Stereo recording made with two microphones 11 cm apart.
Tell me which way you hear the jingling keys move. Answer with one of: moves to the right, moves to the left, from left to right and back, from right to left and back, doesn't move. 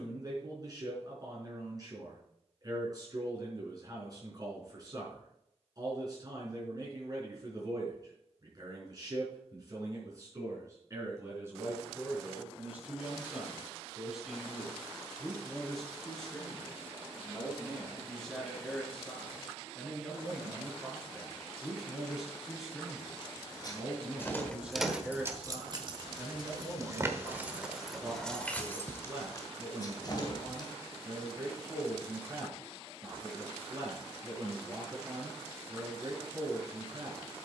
from left to right and back.